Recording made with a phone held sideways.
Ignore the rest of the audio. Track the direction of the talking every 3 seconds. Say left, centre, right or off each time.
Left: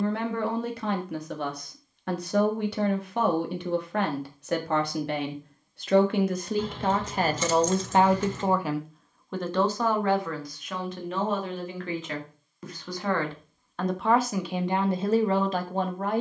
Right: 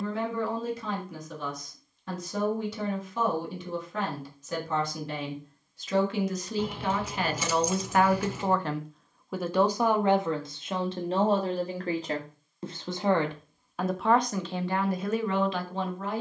left, left, left, right, centre, left.